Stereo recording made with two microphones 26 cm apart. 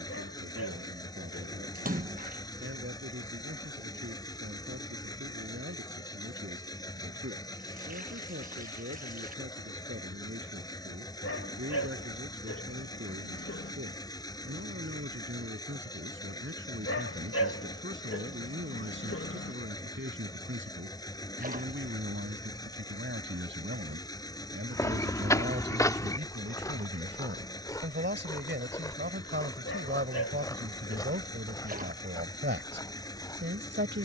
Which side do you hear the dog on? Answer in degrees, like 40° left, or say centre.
50° left.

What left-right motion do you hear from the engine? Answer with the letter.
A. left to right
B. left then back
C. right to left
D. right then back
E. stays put
E.